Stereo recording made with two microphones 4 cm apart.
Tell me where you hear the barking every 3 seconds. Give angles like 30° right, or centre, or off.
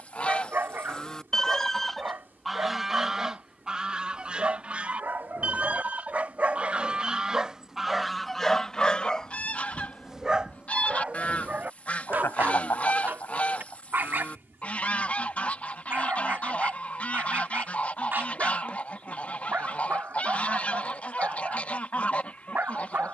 50° right, 50° right, 10° right, 20° right, 50° right, 50° right, 50° right, 50° right.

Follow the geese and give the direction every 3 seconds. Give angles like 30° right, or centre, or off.
10° left, 30° right, 10° right, 30° left, 30° left, 30° left, 30° left, 30° left.